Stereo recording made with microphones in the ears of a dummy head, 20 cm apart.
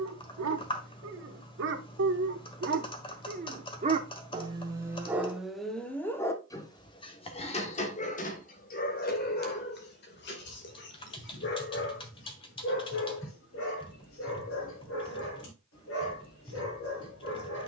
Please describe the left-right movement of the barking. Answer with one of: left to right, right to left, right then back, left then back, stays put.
right to left.